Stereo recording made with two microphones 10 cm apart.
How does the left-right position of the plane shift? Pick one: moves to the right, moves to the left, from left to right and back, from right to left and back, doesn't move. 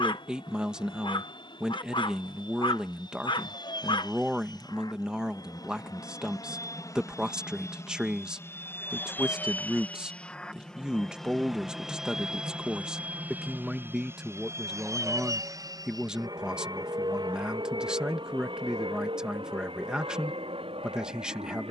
moves to the right.